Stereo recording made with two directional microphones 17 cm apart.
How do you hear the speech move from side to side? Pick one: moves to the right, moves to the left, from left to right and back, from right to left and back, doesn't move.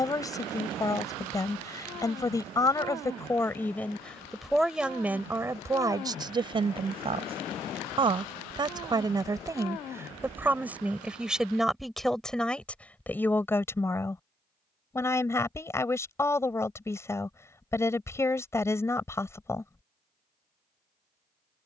from left to right and back.